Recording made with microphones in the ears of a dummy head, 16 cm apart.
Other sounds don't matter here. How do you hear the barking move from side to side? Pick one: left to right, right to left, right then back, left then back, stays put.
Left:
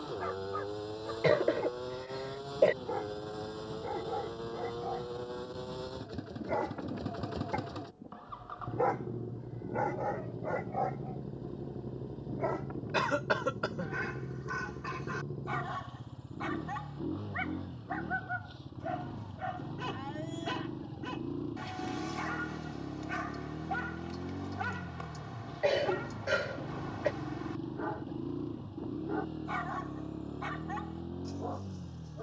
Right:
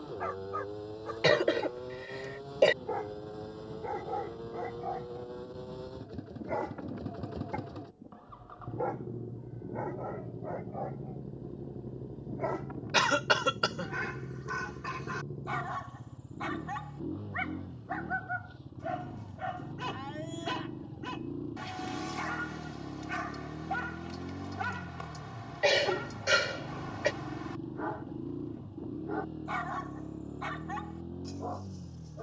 left then back.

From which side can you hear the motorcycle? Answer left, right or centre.
left.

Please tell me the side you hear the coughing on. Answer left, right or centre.
right.